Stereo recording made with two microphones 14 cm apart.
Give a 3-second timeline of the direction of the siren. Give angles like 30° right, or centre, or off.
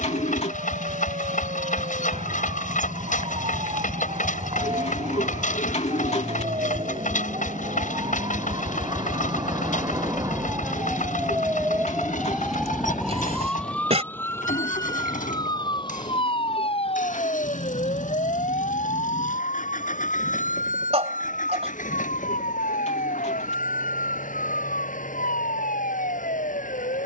60° right, 50° right, 40° right, 20° right, 10° left, 40° left, 60° left, 70° left, 80° left.